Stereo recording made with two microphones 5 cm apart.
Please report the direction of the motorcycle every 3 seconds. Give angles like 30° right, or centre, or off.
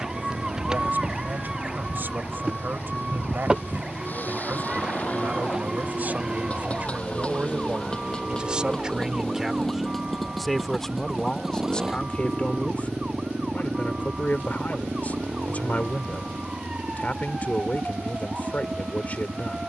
50° left, 40° left, 20° left, centre, 20° right, 40° right, 50° right.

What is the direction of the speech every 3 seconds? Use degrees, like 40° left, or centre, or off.
50° right, 50° right, 30° right, centre, 30° left, 40° left, 40° left.